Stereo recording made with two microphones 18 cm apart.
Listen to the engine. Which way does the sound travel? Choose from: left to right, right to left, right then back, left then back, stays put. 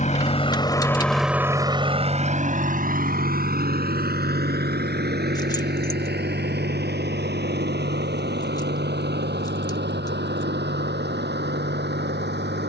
left to right.